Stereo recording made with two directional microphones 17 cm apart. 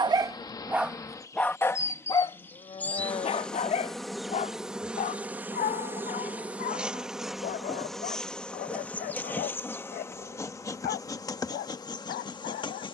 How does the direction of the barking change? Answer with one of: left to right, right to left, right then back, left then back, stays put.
right to left.